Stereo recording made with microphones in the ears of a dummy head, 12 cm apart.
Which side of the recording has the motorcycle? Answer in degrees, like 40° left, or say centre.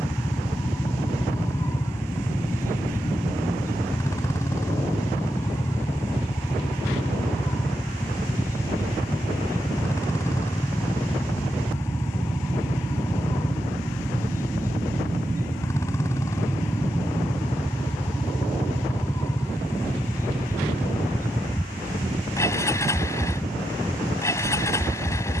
20° left.